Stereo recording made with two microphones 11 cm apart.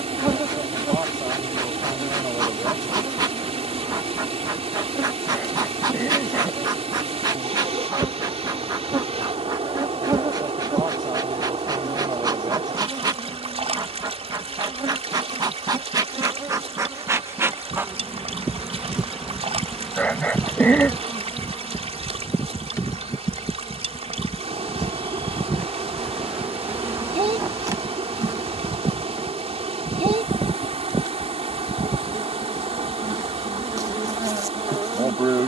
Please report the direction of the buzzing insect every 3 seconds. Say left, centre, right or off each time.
right, right, right, right, right, right, centre, left, centre, right, right, right.